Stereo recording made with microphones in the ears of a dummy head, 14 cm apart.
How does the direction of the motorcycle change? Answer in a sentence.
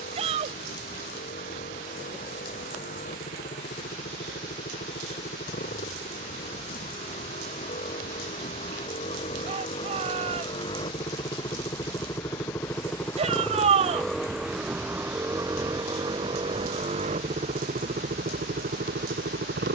You can hear the motorcycle move to the right.